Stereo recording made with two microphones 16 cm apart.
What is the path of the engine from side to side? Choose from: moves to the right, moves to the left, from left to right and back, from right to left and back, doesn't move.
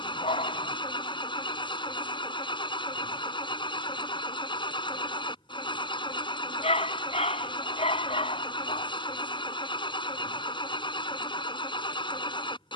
doesn't move.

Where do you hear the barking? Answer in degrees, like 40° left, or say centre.
40° left.